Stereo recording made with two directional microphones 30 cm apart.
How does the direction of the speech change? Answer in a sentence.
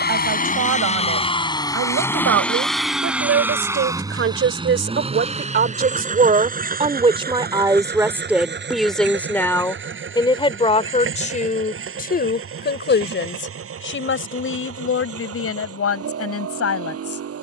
In this clip you hear the speech move to the left.